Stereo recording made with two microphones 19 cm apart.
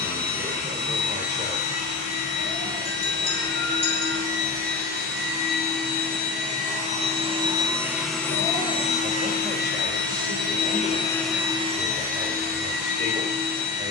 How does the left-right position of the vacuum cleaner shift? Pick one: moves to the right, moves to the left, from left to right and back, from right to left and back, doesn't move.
from right to left and back.